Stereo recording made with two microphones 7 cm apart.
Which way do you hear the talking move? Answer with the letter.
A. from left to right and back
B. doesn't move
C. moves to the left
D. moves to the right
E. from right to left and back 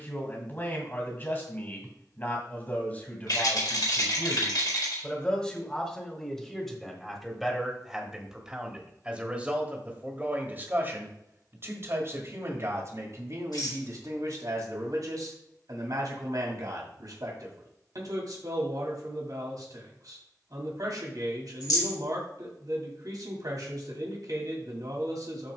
D.